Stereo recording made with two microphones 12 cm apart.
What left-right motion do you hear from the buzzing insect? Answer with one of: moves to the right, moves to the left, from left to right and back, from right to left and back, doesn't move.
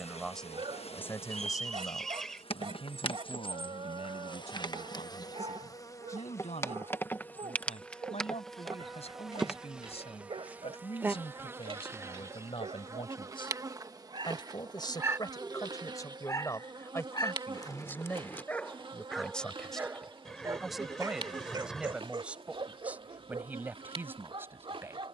moves to the right.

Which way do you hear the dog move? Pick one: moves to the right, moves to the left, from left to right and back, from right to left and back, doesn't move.
from right to left and back.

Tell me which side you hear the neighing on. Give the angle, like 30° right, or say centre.
centre.